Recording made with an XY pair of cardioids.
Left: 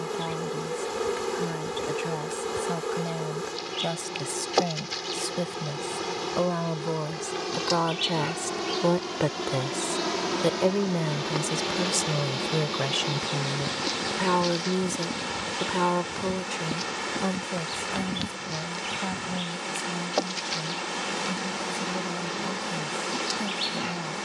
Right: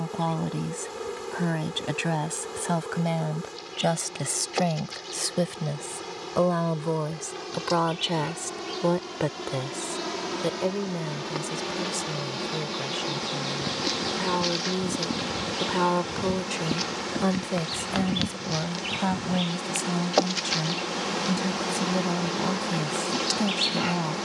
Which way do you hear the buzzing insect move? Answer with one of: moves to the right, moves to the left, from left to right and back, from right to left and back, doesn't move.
moves to the right.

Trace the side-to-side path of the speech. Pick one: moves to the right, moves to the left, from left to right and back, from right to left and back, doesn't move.
from right to left and back.